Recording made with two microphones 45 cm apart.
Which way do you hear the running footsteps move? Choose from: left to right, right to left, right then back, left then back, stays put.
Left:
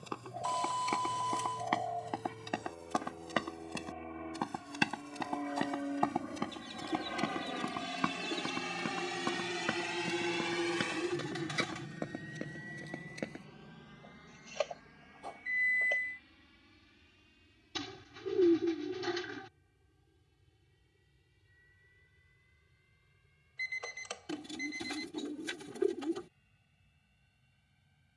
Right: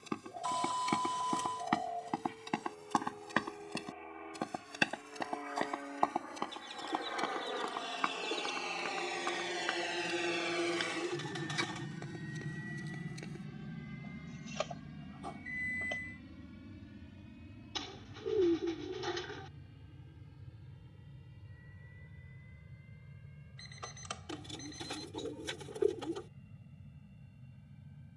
right to left.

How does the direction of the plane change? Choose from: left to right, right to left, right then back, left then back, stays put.
left to right.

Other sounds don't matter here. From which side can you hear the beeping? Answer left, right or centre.
right.